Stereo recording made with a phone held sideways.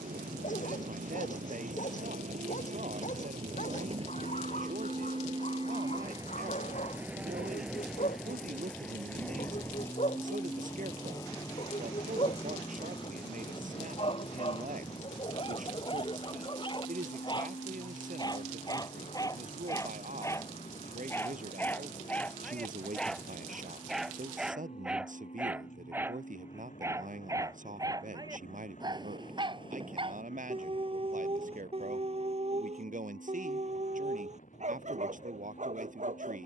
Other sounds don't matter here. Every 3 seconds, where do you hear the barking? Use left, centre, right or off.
left, left, left, left, left, left, left, centre, centre, right, right, right.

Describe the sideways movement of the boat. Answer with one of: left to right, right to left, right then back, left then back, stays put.
right to left.